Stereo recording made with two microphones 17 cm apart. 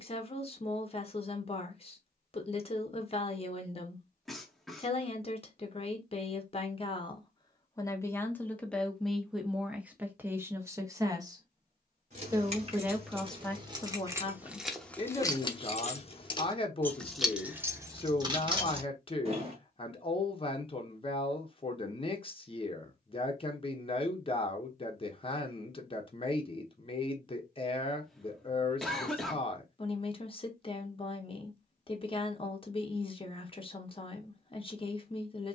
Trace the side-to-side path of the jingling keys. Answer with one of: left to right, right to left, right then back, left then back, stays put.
left then back.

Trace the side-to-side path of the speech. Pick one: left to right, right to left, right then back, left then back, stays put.
right then back.